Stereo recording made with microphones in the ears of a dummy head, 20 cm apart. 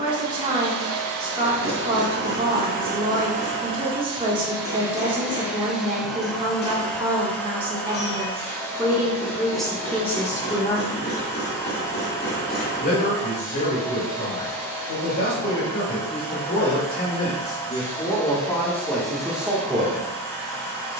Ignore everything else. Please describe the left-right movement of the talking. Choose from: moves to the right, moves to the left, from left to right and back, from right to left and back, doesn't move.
from right to left and back.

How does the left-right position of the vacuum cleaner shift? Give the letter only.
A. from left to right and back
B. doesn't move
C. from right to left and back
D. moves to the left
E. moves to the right
D.